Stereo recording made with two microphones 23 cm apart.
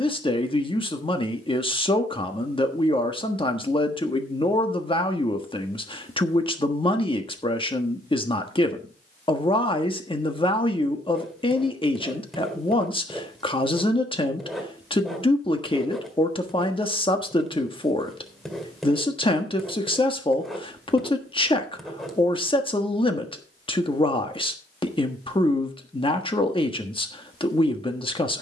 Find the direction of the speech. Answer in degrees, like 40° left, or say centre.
20° left.